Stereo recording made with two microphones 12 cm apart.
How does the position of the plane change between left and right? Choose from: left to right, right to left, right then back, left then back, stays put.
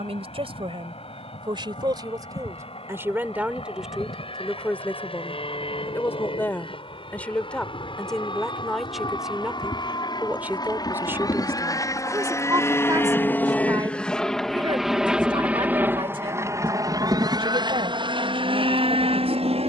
left to right.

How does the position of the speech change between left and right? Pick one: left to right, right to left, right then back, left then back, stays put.
left then back.